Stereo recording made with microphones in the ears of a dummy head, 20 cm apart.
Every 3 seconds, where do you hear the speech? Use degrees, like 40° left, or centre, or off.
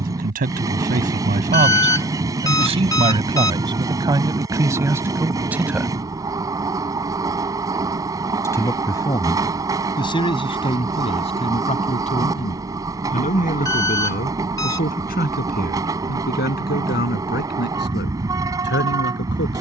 40° right, 10° right, 10° left, 30° left, 40° left, 50° left, 50° left.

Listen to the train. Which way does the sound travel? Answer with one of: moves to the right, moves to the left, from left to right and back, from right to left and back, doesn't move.
doesn't move.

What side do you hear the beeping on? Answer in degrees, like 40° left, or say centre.
20° left.